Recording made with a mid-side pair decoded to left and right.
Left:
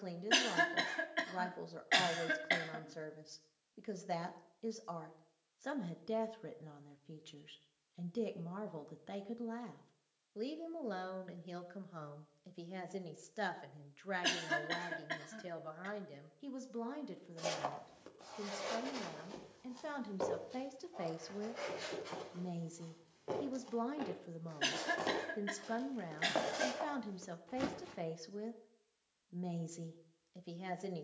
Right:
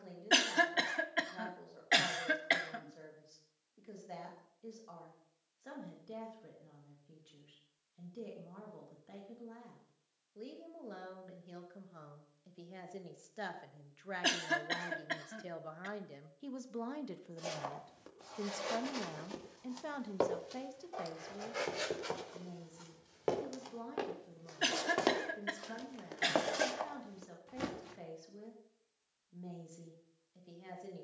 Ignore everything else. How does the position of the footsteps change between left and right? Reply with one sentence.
You can hear the footsteps move from left to right and back again.